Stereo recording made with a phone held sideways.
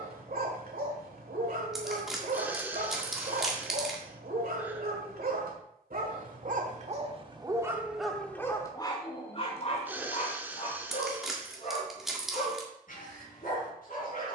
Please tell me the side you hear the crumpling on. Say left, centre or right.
centre.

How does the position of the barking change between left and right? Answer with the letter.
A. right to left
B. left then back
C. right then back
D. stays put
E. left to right
A.